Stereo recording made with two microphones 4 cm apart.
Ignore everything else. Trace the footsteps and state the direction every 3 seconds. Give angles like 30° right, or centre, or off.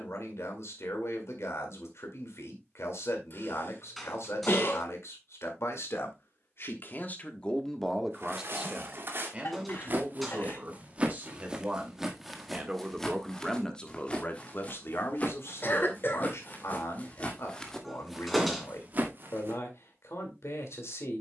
off, off, 60° right, 30° right, 20° left, 40° left, 30° right.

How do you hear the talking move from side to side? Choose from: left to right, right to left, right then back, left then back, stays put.
right then back.